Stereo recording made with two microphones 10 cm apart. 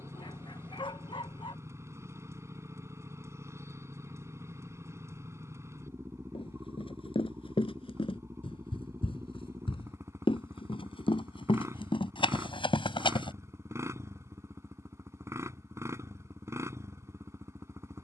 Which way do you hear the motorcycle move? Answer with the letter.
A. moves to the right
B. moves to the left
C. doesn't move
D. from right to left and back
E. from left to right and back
C.